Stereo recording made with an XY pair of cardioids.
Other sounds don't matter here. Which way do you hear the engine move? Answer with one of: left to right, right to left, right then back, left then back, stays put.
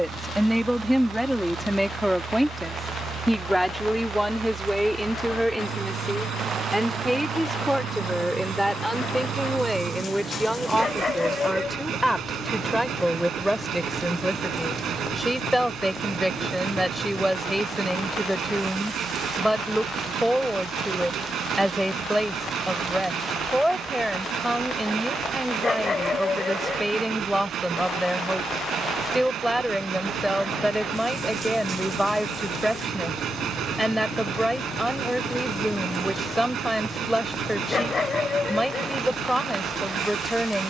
stays put.